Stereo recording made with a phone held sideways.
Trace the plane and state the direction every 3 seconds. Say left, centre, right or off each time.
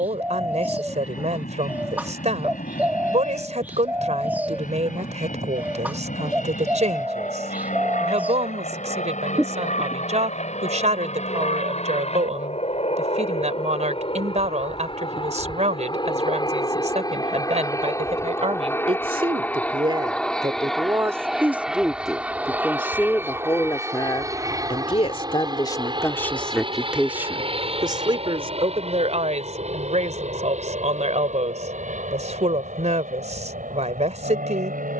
left, left, left, left, left, left, centre, centre, right, right, right, right.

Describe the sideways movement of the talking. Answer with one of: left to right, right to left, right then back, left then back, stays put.
left then back.